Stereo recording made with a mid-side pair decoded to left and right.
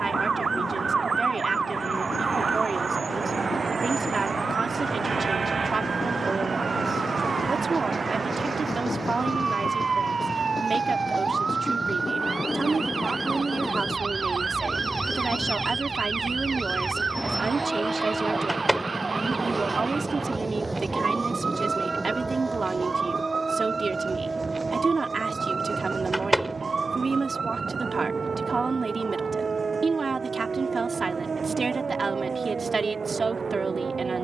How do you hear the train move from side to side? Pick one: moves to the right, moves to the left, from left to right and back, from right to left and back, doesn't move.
moves to the right.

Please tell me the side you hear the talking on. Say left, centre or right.
right.